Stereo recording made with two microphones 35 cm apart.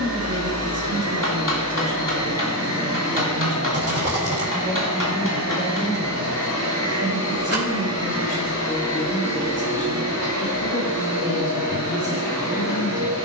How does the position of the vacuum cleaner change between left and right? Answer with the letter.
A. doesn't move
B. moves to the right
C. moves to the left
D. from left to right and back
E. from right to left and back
A.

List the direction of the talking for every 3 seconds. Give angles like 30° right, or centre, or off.
20° right, centre, 20° left, 40° left, 40° left.